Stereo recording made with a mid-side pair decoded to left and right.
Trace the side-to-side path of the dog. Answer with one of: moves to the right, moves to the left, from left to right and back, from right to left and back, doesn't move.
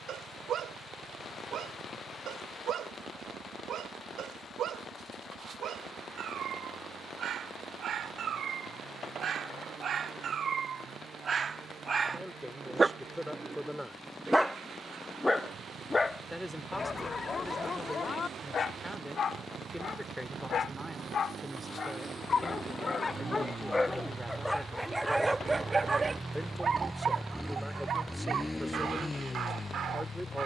from right to left and back.